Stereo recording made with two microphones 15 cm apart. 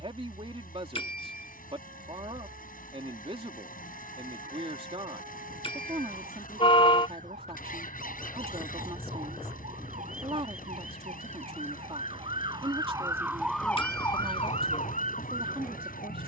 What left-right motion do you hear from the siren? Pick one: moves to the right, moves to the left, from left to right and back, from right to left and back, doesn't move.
moves to the left.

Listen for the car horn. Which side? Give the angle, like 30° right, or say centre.
40° left.